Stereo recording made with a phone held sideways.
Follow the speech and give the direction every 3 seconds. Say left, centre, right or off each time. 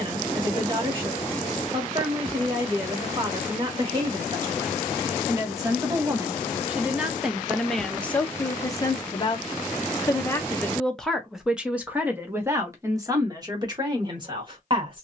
right, right, centre, centre, right.